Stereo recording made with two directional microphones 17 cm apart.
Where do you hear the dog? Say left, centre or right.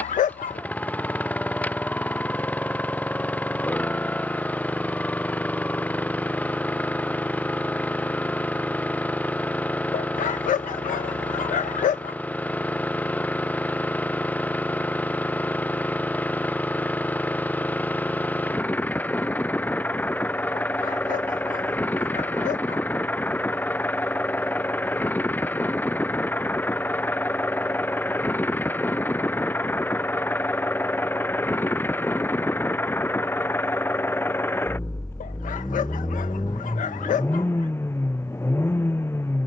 left.